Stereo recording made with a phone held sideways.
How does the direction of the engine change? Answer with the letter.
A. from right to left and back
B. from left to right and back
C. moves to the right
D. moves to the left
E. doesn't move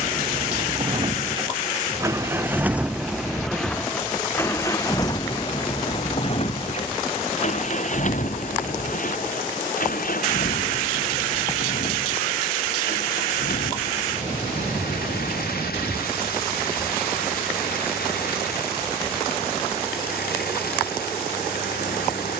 D.